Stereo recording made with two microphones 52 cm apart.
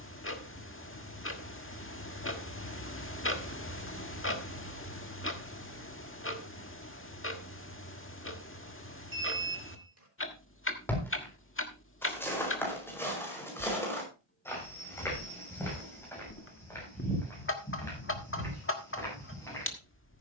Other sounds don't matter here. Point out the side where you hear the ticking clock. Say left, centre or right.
left.